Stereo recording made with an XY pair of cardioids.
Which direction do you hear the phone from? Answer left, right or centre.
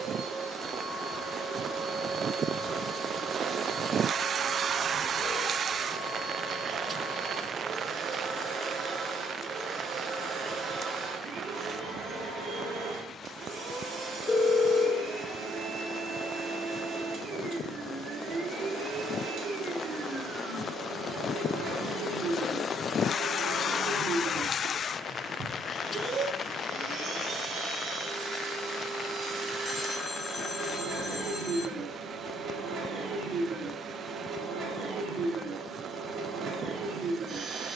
left.